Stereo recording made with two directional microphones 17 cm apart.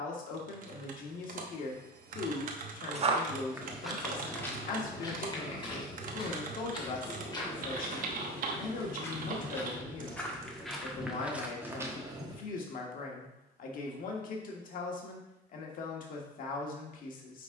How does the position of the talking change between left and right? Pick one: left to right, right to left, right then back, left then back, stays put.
stays put.